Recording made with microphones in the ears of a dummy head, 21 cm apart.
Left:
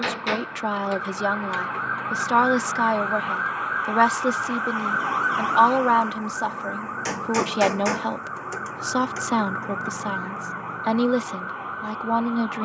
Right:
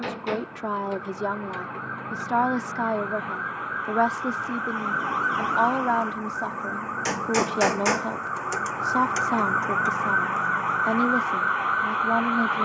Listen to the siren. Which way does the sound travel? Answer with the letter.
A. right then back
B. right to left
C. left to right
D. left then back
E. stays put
C.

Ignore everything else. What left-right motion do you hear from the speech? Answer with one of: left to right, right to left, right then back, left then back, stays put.
stays put.